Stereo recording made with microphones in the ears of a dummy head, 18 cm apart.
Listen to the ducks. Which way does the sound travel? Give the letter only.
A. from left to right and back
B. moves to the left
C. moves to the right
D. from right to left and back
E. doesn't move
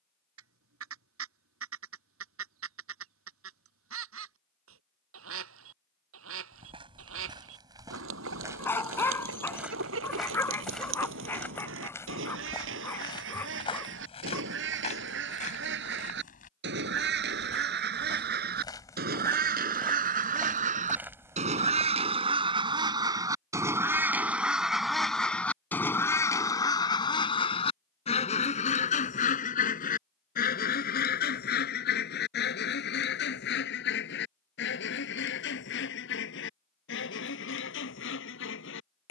B.